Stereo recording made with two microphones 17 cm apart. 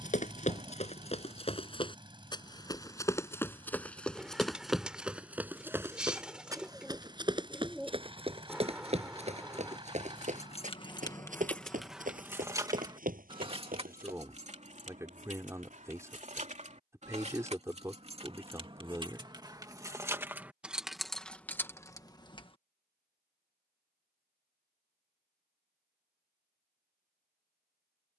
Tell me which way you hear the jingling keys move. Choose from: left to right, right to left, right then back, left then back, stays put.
right then back.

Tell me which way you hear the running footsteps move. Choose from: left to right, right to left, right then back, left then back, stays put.
left to right.